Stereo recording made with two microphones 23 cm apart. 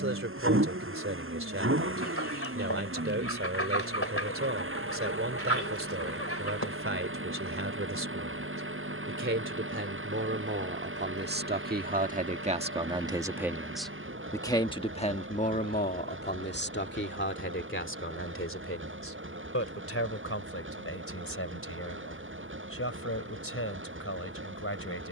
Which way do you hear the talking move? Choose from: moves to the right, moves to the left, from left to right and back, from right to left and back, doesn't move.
moves to the left.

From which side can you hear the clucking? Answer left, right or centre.
left.